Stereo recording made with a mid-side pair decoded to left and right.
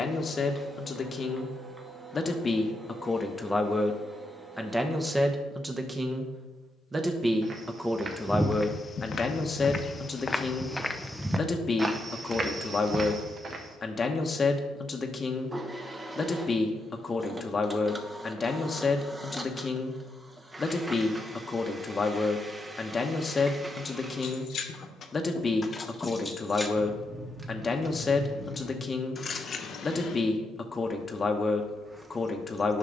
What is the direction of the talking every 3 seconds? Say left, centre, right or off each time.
left, centre, centre, left, left, left, left, left, left, left, left.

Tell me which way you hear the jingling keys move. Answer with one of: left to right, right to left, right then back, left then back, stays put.
right then back.